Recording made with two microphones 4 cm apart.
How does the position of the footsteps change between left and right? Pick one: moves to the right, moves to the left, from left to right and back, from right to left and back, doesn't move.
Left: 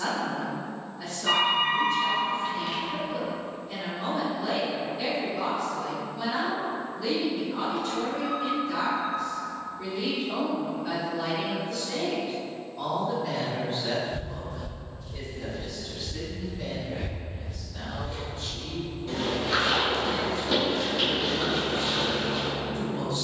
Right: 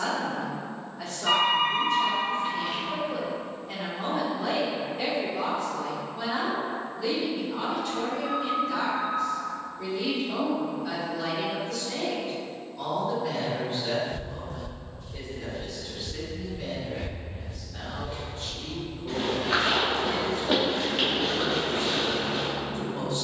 from right to left and back.